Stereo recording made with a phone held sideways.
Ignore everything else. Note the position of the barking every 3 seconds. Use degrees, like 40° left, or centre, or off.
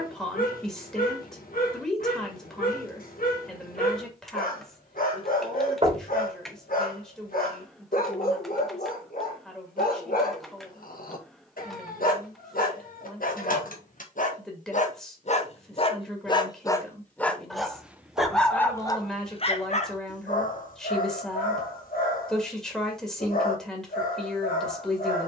70° left, 70° left, 70° left, 70° left, 70° left, 20° left, 40° left, 70° left, 70° left.